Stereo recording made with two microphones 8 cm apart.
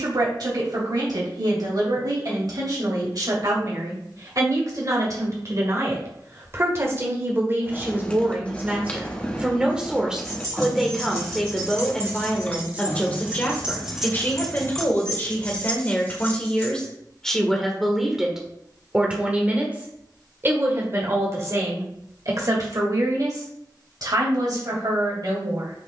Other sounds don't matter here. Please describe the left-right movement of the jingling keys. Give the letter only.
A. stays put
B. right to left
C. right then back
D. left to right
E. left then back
B.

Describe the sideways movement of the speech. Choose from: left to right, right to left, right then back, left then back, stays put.
left then back.